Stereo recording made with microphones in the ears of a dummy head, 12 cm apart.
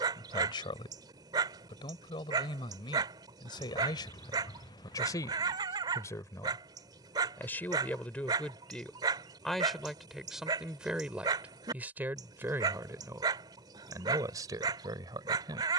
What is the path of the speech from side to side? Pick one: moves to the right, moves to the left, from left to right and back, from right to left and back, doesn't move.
moves to the right.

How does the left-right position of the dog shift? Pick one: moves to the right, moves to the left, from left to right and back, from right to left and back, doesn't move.
doesn't move.